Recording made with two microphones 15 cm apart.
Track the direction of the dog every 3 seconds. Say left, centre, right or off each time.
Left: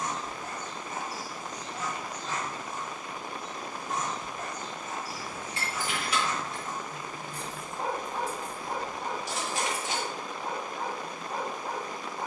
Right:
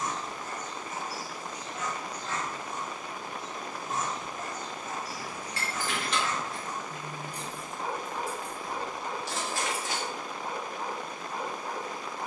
left, centre, left, left.